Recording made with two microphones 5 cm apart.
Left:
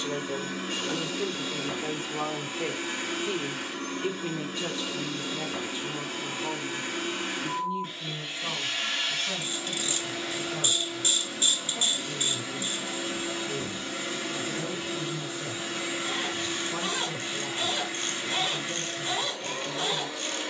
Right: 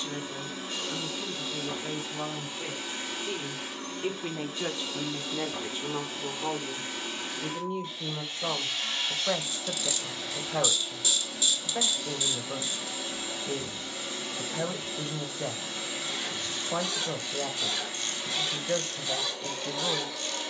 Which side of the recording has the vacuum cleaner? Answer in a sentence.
You can hear the vacuum cleaner on the left.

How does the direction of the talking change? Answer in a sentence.
In this clip you hear the talking go from the left side to the right.